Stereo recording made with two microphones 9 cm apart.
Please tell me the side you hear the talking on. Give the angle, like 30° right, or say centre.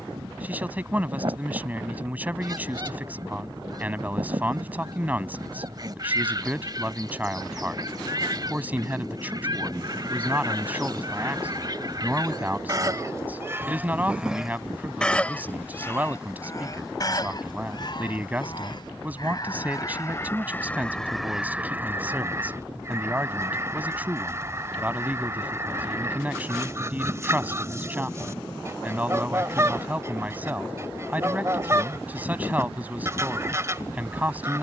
20° right.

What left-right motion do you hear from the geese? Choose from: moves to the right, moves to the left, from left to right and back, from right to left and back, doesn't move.
from right to left and back.